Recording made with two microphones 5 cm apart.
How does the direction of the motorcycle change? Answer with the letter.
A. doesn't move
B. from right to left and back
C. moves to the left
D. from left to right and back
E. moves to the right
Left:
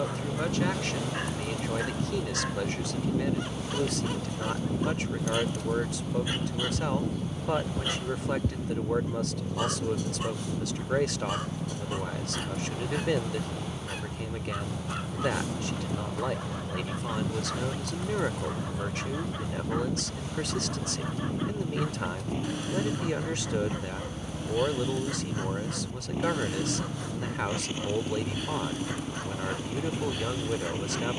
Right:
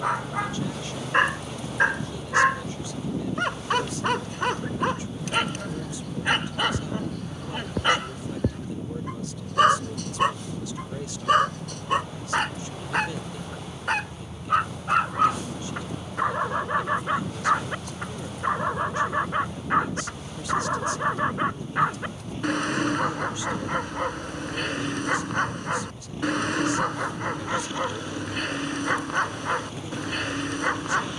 A.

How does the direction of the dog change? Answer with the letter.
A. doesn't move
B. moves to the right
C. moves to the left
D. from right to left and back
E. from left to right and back
A.